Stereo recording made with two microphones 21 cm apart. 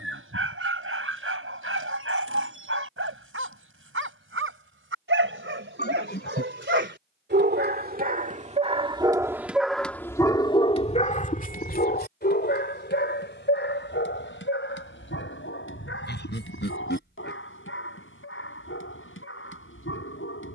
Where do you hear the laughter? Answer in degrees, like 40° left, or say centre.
50° left.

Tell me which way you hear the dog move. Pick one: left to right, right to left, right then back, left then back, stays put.
right to left.